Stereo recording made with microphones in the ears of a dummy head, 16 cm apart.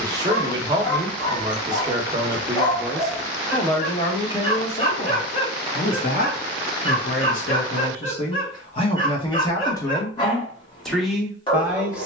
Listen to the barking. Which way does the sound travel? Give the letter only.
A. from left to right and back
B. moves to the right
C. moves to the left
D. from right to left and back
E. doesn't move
E.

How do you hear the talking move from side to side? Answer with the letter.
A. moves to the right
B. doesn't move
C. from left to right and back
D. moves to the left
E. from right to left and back
E.